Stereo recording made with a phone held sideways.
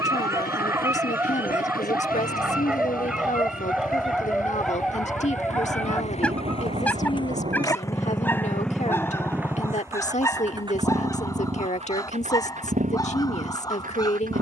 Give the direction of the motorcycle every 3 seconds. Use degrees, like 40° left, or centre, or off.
70° left, 60° left, 20° left, 20° right, 50° right.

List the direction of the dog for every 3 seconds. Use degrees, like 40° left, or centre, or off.
10° right, centre, 10° left, 20° left, 20° left.